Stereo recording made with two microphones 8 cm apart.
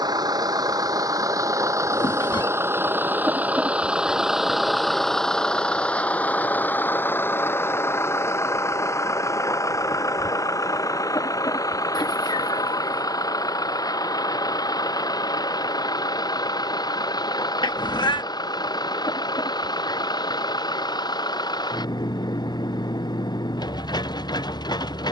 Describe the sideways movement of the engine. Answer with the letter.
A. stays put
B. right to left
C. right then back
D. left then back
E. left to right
B.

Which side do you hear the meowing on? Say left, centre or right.
left.